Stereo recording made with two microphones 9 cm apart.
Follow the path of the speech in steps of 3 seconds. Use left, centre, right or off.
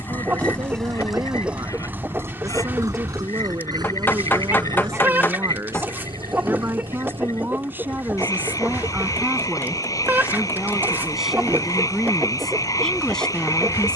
right, right, right, centre, centre.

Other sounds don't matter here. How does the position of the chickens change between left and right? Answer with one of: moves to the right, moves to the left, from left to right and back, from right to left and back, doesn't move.
doesn't move.